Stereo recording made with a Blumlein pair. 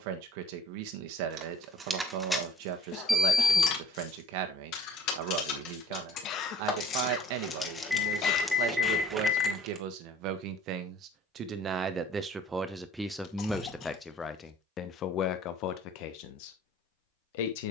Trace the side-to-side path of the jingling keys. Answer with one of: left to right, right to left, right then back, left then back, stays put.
left then back.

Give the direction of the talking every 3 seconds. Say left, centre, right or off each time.
right, right, right, right, centre, left.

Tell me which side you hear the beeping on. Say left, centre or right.
centre.